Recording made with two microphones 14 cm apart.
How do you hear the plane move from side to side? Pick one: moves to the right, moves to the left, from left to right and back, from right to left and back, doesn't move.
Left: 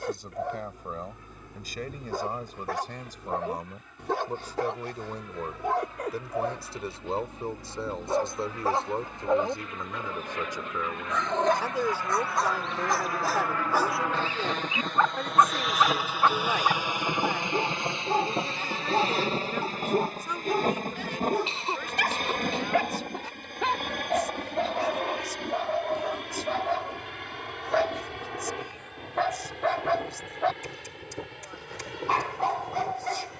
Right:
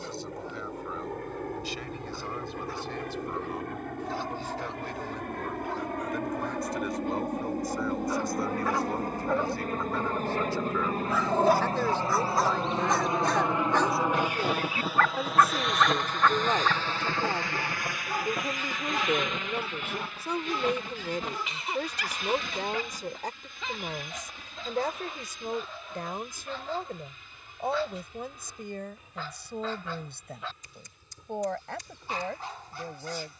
moves to the left.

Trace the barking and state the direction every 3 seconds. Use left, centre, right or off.
left, left, left, centre, centre, left, left, left, left, left, left.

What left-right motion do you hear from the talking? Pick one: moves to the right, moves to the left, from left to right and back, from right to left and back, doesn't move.
moves to the right.